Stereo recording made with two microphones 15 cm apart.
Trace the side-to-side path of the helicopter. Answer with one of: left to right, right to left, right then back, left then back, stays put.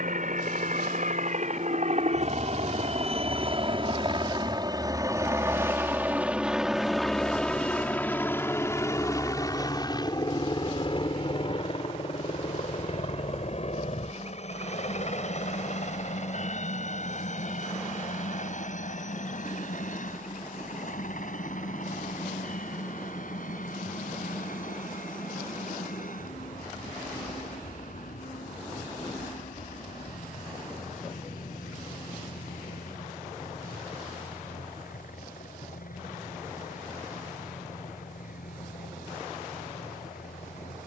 right to left.